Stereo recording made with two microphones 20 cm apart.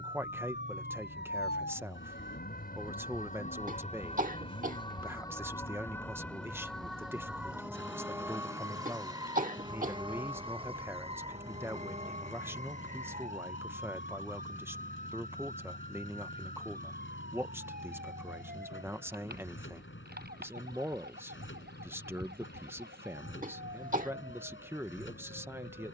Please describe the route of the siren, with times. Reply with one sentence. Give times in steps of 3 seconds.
You can hear the siren on the left from 0 s, in the centre from 6 s and on the right from 9 s.